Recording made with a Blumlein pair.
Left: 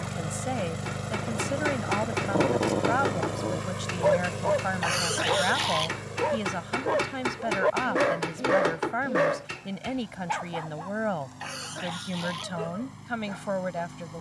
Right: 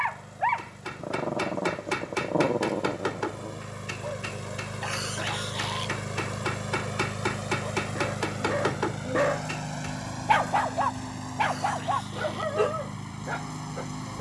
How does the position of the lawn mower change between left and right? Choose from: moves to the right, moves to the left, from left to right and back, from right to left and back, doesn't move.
moves to the right.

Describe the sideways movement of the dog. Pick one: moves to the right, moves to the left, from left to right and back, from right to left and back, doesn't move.
from right to left and back.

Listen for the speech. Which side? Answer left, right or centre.
left.